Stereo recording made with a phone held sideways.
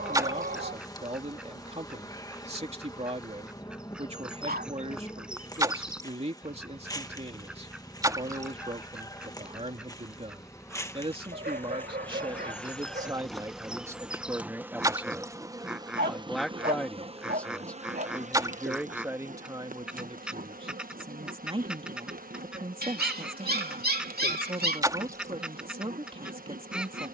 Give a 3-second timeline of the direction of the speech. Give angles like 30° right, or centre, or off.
40° right, 40° right, 40° right, 40° right, 20° right, centre, 20° right, 40° right, 40° right.